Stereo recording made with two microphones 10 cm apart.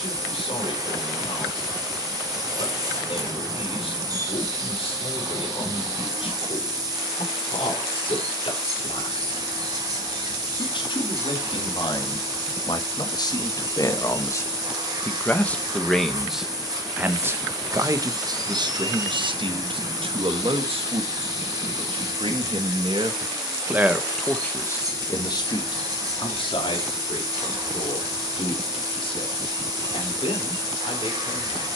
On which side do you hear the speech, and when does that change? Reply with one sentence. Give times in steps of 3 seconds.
You can hear the speech on the left from 0 s, in the centre from 15 s, on the right from 18 s and on the left from 24 s.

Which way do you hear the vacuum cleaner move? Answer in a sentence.
You can hear the vacuum cleaner stay put.